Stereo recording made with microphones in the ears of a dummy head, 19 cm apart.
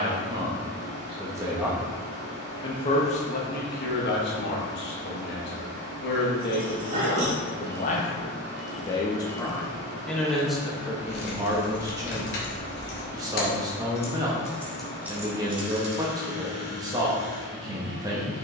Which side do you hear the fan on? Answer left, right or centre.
right.